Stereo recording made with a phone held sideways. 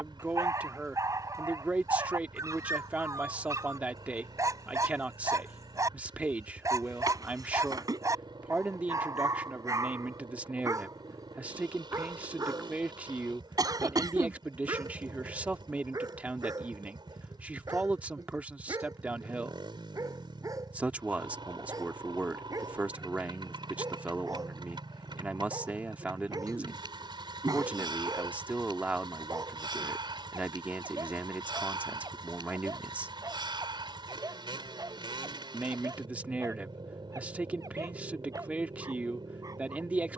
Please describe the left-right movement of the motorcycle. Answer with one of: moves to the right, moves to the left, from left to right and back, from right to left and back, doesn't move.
doesn't move.